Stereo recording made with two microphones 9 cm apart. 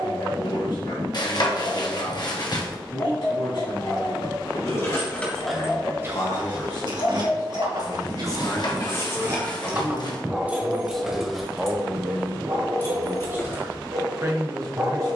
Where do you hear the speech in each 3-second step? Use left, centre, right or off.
left, left, left, centre, right.